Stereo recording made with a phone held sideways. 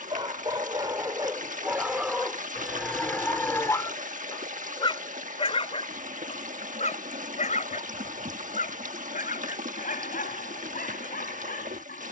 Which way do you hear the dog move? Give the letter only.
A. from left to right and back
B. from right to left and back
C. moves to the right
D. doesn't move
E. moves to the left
E.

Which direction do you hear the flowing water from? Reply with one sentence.
You can hear the flowing water on the right.